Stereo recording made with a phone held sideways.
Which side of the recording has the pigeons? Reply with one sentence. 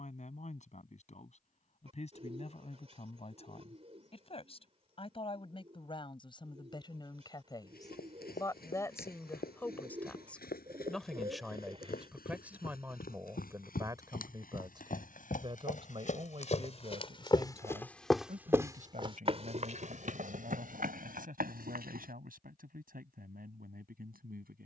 In this clip you hear the pigeons on the right.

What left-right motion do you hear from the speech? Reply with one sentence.
In this clip you hear the speech move from left to right.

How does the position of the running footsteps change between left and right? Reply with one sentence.
You can hear the running footsteps travel towards the right.